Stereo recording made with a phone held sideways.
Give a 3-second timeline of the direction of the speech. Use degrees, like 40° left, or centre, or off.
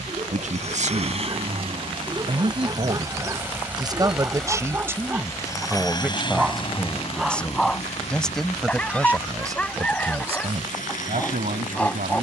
50° right, 20° right, centre, 50° right.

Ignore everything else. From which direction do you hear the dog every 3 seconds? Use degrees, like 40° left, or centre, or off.
30° right, 20° right, centre, 10° left.